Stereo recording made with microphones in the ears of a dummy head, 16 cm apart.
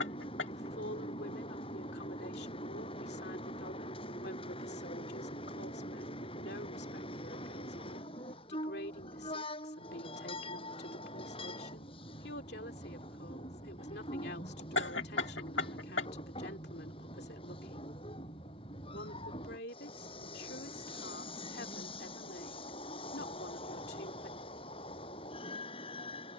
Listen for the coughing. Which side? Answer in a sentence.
In this clip you hear the coughing on the left.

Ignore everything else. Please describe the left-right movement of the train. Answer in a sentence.
In this clip you hear the train stay put.